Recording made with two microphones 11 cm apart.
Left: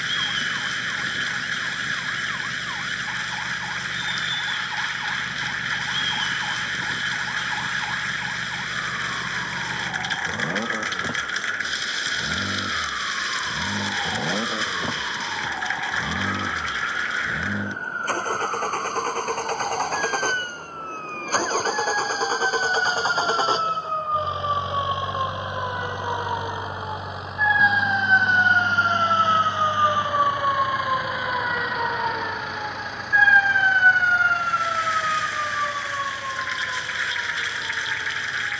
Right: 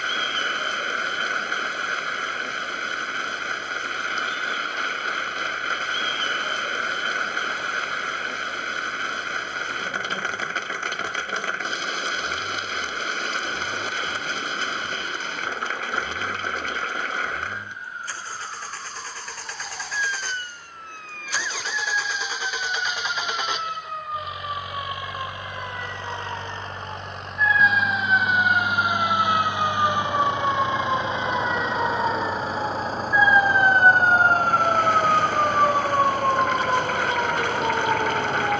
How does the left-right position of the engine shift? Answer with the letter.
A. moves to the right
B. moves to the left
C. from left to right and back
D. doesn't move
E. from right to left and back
A.